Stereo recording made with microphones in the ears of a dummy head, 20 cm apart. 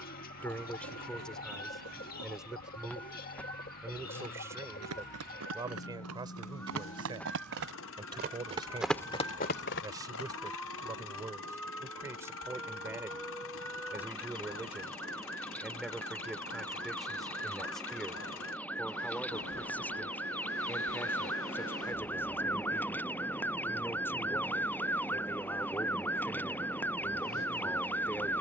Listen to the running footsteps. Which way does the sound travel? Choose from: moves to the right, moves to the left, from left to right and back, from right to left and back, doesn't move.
moves to the left.